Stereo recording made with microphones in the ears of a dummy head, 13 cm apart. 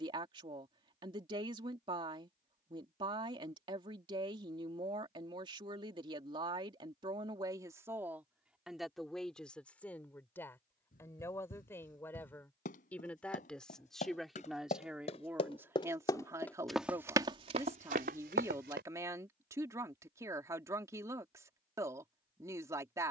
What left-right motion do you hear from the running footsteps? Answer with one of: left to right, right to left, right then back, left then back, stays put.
left to right.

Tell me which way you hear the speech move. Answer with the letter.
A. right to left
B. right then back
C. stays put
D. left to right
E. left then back
E.